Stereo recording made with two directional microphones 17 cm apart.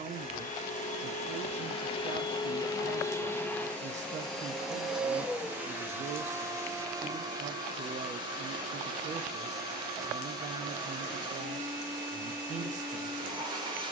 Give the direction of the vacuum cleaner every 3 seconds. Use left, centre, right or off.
left, centre, right, right, right.